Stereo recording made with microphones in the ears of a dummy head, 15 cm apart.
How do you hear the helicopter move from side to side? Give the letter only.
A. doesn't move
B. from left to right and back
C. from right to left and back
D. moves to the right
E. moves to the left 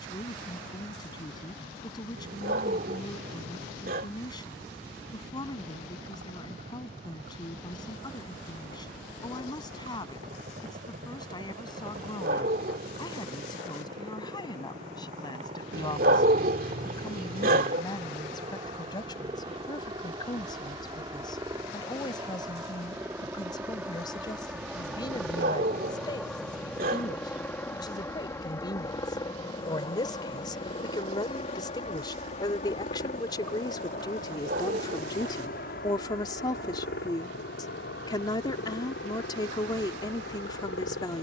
E.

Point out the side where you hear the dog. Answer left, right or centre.
right.